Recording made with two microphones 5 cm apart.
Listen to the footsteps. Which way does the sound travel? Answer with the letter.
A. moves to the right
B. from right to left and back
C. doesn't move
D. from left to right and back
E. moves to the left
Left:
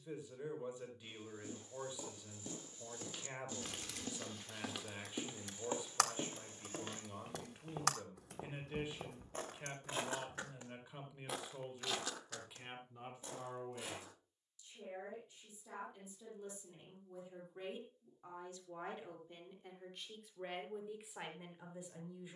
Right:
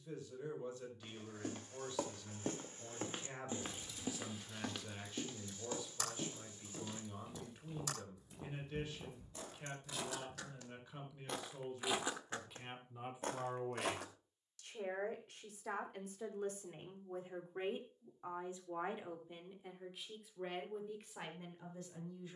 B.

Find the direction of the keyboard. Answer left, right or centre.
left.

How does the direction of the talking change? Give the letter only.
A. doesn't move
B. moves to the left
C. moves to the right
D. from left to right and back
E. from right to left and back
D.